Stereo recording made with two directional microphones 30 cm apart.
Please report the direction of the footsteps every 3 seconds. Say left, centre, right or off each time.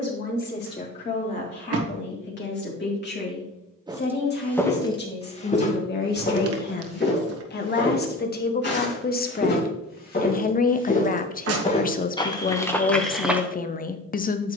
off, centre, left, left, centre.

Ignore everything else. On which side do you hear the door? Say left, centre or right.
right.